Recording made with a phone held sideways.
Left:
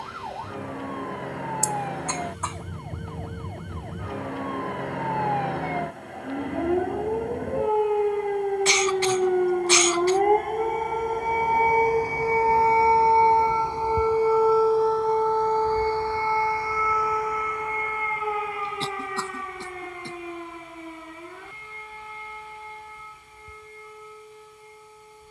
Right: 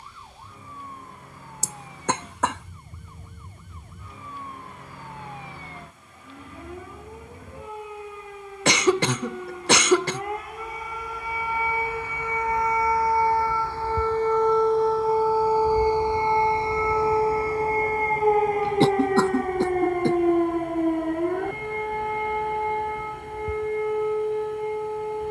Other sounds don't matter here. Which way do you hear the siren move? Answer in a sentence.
In this clip you hear the siren travel towards the right.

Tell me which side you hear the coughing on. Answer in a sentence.
In this clip you hear the coughing on the right.